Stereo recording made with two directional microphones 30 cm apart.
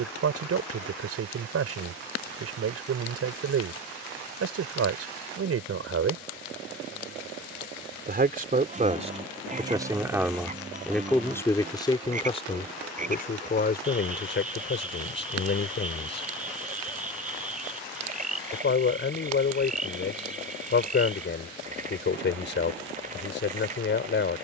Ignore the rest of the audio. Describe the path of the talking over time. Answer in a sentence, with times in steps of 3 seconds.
In this clip you hear the talking on the right from 0 s, in the centre from 9 s and on the left from 12 s.